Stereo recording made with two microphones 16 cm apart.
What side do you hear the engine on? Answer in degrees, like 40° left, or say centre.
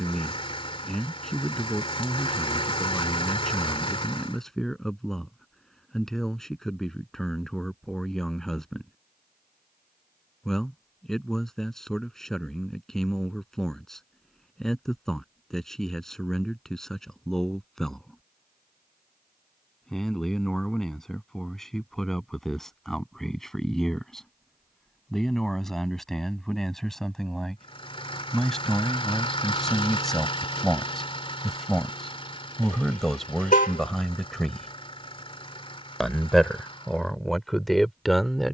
30° left.